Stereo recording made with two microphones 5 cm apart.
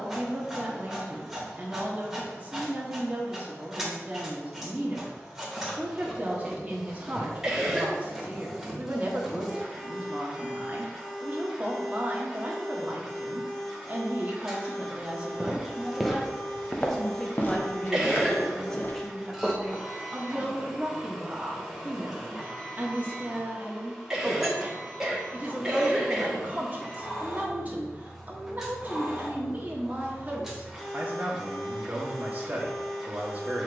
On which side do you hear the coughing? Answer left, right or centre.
centre.